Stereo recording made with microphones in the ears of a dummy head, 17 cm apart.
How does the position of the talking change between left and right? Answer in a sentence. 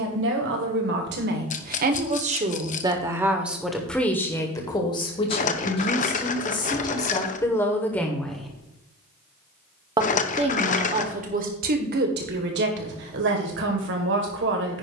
In this clip you hear the talking go left and come back.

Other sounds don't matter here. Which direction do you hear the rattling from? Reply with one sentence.
You can hear the rattling on the left.